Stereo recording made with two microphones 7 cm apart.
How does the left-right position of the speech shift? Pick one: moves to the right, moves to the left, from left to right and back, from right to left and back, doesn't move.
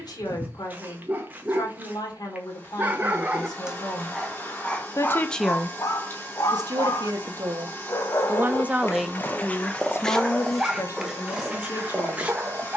from left to right and back.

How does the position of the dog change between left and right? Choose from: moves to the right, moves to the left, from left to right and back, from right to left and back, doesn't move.
from right to left and back.